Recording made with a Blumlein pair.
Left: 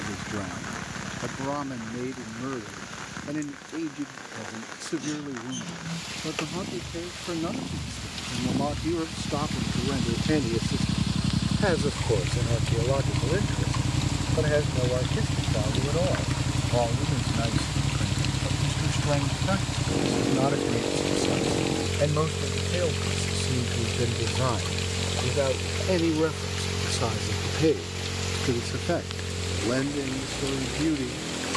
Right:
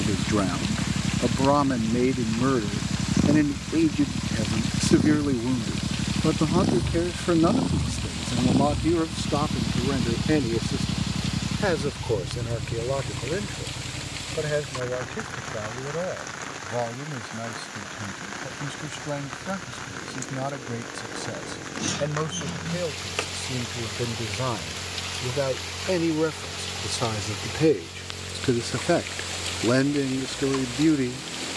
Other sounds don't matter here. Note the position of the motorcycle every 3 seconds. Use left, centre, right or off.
right, right, right, centre, left, left, left, left, left, left, left.